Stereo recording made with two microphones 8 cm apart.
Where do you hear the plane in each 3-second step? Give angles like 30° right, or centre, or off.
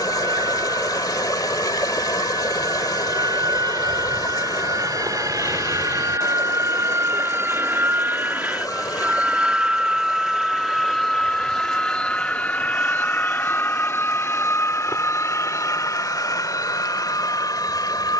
70° right, 60° right, 30° right, centre, 20° left, 40° left.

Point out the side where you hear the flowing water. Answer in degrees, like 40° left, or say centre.
50° left.